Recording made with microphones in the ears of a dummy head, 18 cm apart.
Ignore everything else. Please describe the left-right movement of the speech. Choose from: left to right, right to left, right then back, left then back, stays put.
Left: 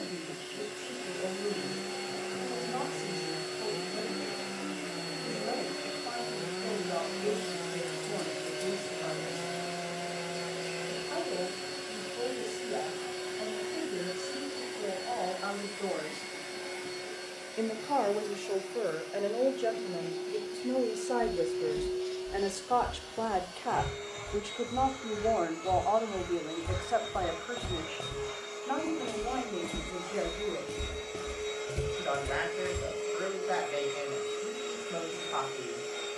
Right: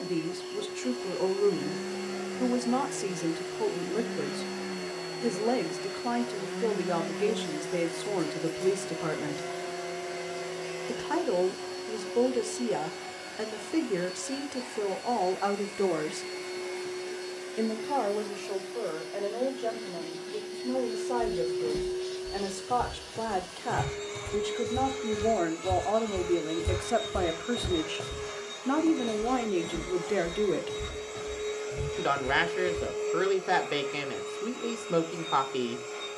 left then back.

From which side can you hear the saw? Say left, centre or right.
centre.